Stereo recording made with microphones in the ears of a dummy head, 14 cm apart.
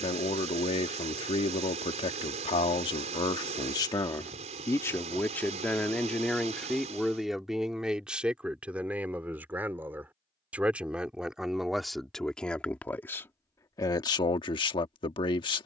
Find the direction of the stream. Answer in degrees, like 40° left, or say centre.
40° right.